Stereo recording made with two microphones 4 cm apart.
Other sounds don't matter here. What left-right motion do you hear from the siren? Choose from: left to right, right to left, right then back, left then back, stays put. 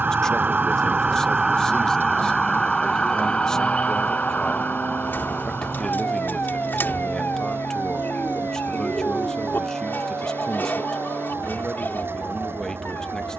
right to left.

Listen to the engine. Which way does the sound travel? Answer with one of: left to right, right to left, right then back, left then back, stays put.
stays put.